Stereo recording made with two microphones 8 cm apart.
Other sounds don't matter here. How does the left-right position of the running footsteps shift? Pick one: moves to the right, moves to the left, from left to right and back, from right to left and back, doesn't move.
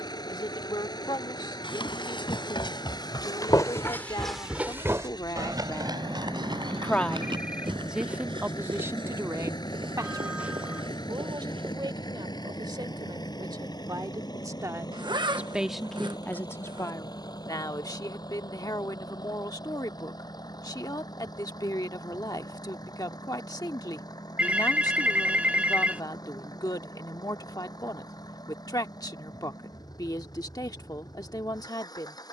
moves to the right.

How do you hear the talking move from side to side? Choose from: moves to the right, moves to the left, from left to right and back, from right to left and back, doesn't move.
from left to right and back.